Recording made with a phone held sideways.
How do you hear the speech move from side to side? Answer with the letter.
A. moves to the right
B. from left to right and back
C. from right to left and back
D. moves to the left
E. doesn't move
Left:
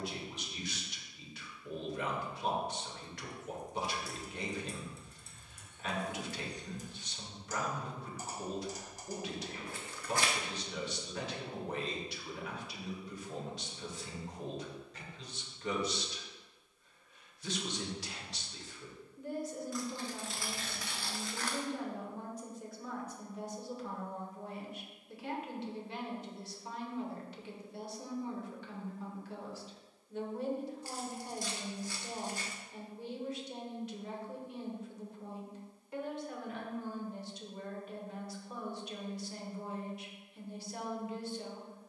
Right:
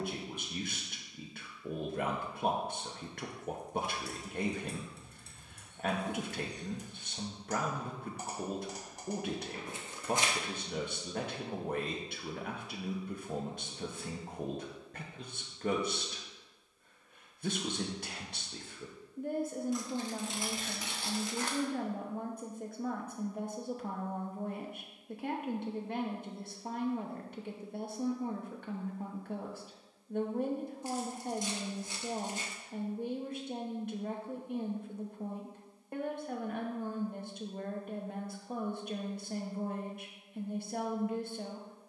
E.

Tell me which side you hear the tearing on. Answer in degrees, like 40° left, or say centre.
20° right.